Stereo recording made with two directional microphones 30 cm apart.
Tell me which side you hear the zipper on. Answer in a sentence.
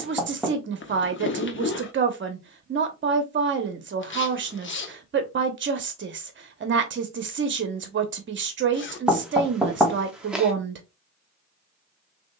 You can hear the zipper on the left.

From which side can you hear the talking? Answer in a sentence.
In this clip you hear the talking on the right.